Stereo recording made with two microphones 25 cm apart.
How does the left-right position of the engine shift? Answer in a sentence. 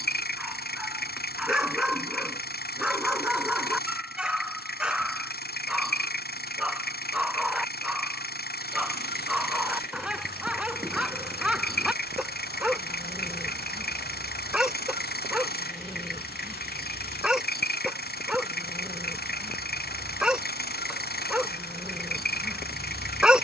In this clip you hear the engine stay in one place.